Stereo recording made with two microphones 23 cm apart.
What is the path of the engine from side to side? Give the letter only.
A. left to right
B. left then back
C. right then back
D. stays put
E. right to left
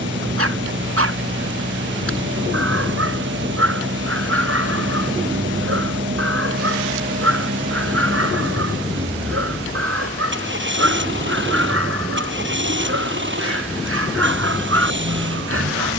D.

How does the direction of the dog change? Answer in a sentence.
In this clip you hear the dog stay in one place.